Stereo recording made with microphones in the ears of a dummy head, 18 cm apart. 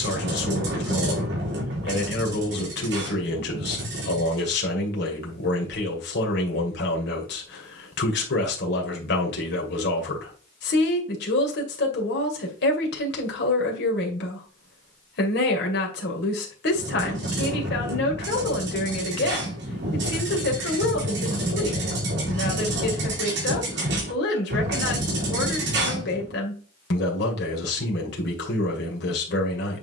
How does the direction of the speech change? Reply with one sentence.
You can hear the speech stay put.